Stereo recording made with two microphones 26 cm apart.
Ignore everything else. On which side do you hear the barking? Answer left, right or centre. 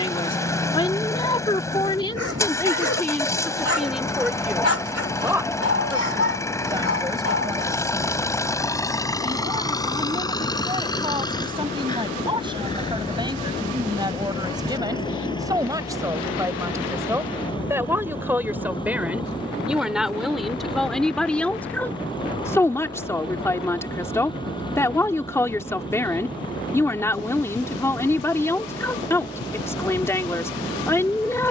left.